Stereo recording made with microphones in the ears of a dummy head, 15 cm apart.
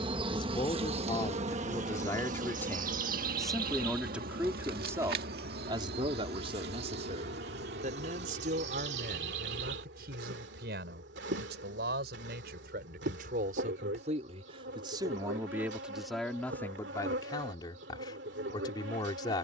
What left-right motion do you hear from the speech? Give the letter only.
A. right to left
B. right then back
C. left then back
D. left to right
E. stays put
B.